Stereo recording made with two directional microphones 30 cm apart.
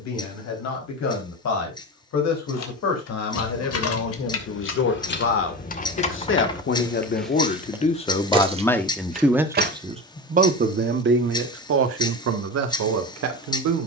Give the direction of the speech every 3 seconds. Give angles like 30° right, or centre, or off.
60° left, 50° left, 30° left, 30° right, 60° right.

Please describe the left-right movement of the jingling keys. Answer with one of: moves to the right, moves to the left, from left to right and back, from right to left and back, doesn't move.
moves to the right.